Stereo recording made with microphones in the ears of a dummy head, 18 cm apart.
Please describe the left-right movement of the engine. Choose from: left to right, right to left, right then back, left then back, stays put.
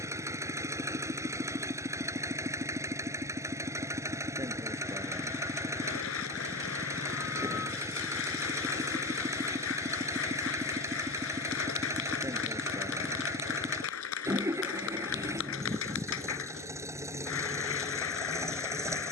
stays put.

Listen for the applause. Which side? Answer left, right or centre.
left.